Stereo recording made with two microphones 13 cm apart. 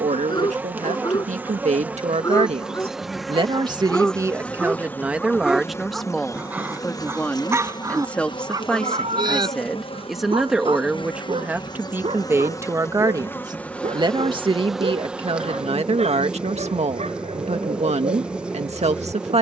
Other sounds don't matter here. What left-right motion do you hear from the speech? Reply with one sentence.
In this clip you hear the speech move from right to left and back again.